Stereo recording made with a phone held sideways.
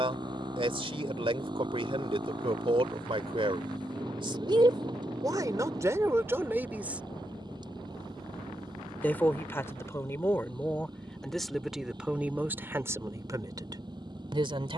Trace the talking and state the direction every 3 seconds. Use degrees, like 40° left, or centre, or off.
40° right, 30° right, 10° right, 10° left, 20° right.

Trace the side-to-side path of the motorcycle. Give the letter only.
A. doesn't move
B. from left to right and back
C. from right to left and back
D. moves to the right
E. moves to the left
A.